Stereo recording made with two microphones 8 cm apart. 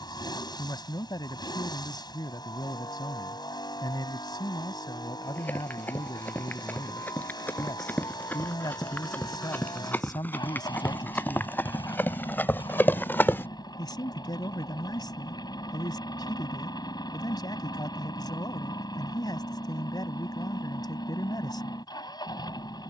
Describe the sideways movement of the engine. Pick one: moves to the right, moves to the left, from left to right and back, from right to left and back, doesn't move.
doesn't move.